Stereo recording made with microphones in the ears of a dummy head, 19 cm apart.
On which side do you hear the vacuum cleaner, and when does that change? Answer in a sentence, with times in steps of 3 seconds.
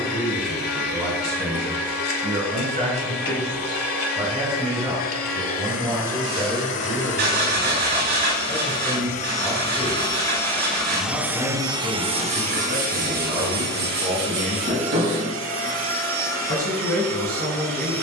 You can hear the vacuum cleaner on the left from 0 s, in the centre from 9 s and on the right from 12 s.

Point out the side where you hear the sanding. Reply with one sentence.
In this clip you hear the sanding on the right.